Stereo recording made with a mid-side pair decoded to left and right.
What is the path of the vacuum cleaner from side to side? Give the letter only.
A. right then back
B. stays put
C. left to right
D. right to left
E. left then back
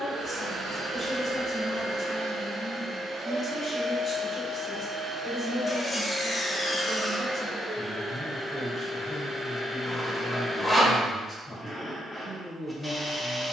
D.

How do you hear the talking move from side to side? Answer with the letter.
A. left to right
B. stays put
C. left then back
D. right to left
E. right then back
B.